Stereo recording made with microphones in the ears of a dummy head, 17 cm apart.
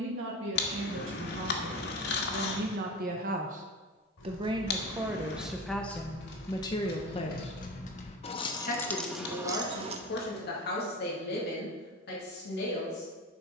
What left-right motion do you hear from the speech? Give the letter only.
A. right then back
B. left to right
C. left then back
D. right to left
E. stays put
D.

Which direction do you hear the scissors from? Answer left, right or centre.
left.